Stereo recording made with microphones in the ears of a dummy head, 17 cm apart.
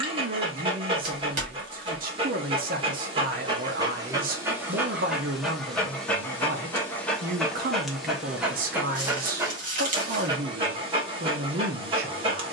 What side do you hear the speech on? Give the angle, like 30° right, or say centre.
50° right.